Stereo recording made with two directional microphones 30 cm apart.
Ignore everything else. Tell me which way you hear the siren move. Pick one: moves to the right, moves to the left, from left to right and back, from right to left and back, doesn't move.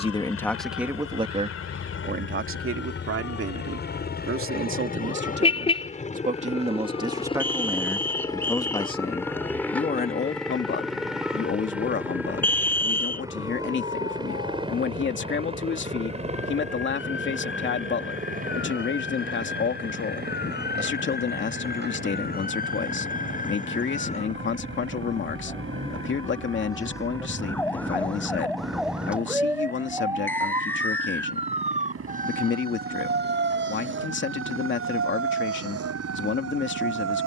moves to the right.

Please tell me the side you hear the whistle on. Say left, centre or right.
centre.